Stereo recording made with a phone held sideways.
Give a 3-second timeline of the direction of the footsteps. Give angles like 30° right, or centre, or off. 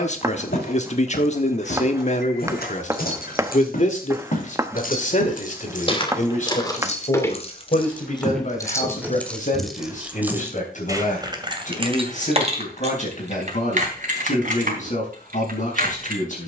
70° left, 50° left, 10° left, 10° right, off, off.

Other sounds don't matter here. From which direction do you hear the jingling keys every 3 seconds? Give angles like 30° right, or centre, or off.
70° left, 60° left, 30° left, 10° right, 50° right, 60° right.